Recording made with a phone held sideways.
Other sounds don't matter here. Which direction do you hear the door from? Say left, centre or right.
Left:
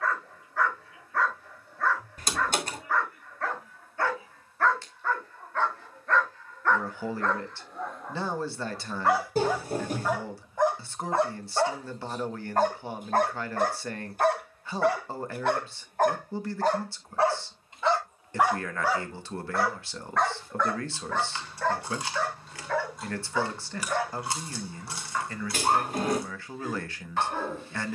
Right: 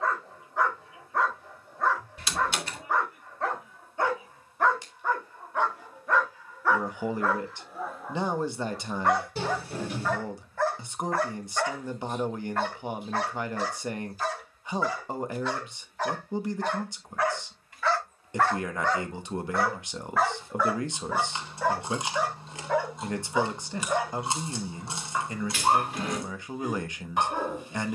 left.